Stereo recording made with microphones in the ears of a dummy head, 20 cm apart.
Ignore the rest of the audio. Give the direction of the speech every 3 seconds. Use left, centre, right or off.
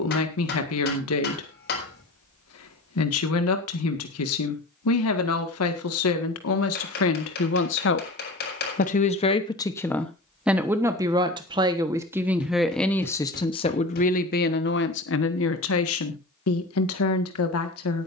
left, left, left, centre, left, left.